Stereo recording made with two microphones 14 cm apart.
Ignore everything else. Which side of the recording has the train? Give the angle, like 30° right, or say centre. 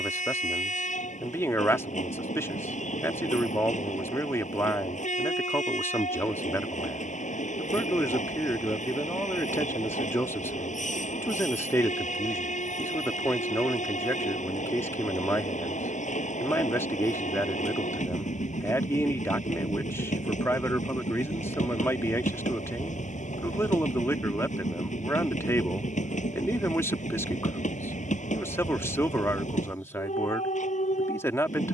60° left.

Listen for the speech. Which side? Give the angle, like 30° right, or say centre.
20° left.